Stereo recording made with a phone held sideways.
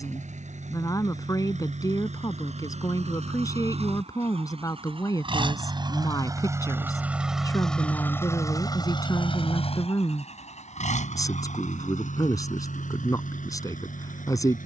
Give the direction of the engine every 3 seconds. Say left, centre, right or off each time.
right, right, centre, left, left.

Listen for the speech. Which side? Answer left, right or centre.
left.